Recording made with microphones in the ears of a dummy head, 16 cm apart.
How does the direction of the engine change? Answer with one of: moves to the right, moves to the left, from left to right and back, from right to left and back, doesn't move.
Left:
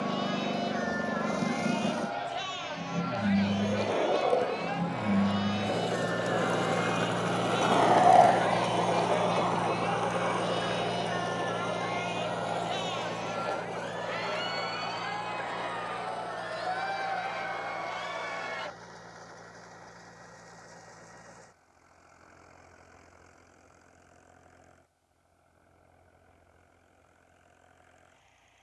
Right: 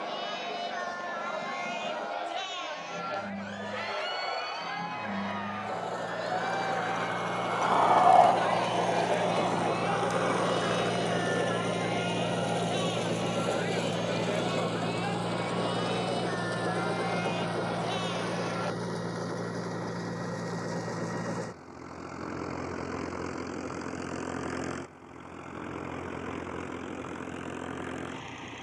moves to the right.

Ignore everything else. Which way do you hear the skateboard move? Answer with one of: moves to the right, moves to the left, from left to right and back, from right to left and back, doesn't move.
moves to the right.